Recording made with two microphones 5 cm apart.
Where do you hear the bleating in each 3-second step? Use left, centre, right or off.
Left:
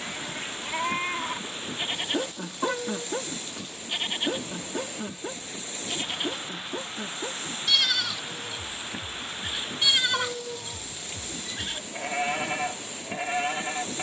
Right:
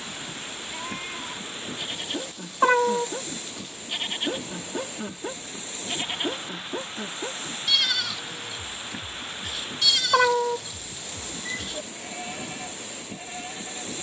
left, centre, centre, left, left.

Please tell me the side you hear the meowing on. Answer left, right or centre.
right.